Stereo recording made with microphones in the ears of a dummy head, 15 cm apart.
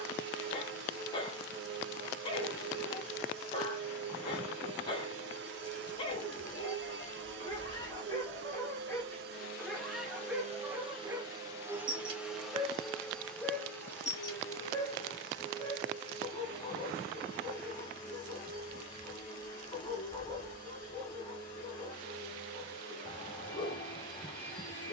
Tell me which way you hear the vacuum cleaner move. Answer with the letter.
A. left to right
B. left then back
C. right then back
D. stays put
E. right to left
E.